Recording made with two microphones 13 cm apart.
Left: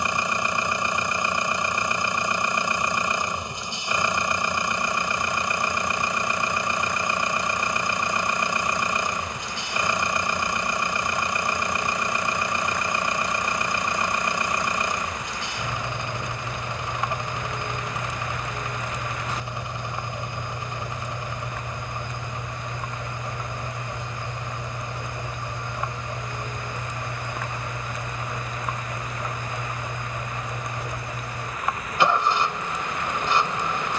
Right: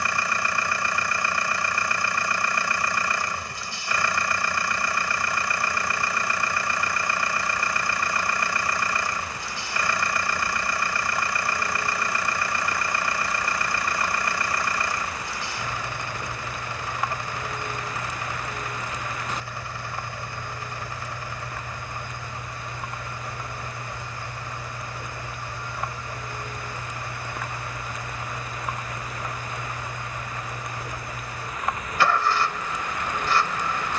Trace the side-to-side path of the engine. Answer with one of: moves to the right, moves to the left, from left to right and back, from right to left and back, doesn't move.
doesn't move.